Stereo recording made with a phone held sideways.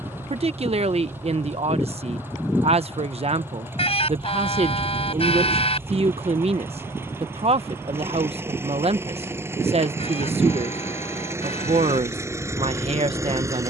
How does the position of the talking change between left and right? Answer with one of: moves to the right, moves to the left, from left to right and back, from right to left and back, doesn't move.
doesn't move.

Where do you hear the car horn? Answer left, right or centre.
left.